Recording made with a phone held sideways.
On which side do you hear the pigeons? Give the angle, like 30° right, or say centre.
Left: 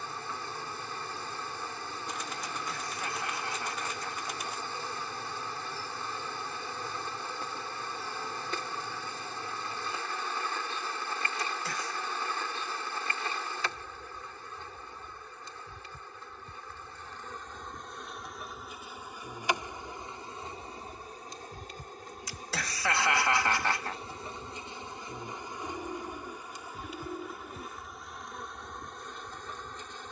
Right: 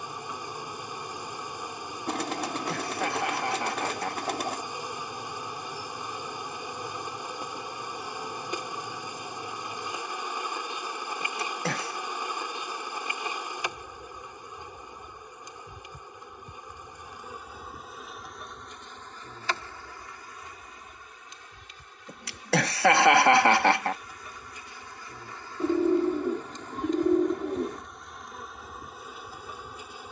80° right.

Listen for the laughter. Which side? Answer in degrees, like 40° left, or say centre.
80° right.